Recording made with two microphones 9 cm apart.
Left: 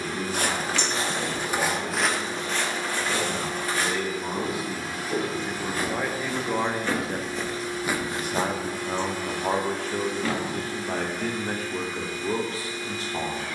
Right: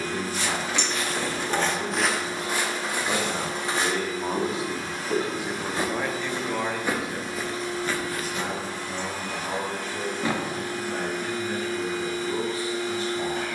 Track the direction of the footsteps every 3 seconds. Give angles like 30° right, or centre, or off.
10° left, 20° right, centre, off, off.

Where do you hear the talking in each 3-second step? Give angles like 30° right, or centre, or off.
50° right, 20° right, 40° left, 70° left, 70° left.